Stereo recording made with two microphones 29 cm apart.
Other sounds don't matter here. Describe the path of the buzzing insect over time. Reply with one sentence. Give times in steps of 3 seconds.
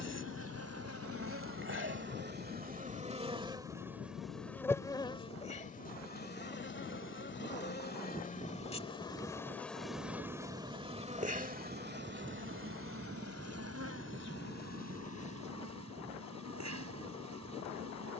You can hear the buzzing insect on the right from 0 s, in the centre from 3 s, on the left from 6 s, in the centre from 9 s and on the right from 12 s.